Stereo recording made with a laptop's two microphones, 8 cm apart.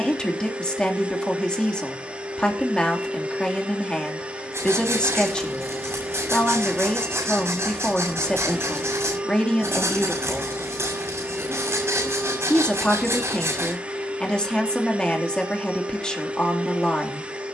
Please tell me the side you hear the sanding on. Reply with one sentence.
In this clip you hear the sanding on the right.